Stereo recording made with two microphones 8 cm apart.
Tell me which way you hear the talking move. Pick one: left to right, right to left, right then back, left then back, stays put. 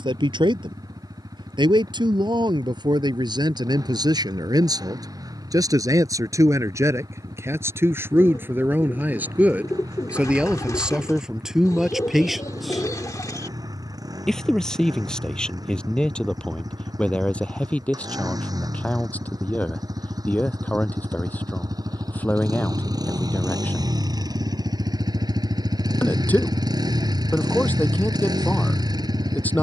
right to left.